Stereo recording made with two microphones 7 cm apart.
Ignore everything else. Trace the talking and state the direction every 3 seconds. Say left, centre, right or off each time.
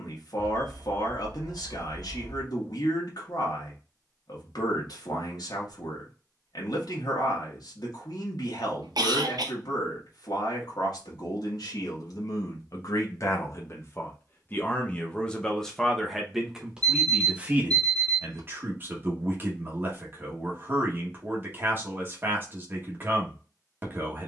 left, left, left, left, left, centre, right, right.